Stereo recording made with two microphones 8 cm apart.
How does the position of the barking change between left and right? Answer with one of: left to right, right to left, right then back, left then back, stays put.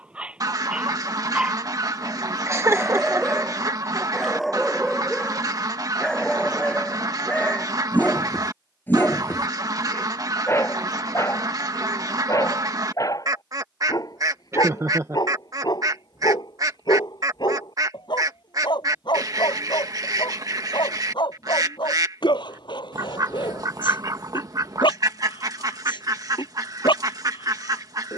right to left.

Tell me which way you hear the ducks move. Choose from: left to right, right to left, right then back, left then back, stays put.
stays put.